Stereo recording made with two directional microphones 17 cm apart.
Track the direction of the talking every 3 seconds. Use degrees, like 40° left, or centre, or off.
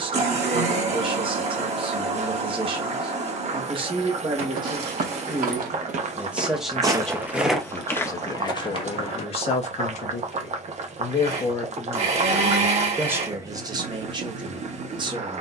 30° right, 30° right, 10° left, 30° left, 20° right.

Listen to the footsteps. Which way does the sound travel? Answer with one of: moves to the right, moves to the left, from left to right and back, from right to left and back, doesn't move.
moves to the left.